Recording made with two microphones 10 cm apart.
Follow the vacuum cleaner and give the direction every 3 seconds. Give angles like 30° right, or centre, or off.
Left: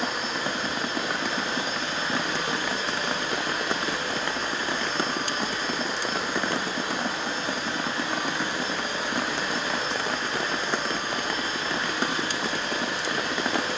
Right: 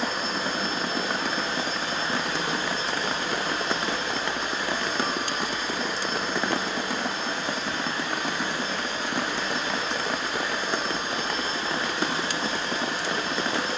40° right, 20° right, 10° left, 10° right, 30° right.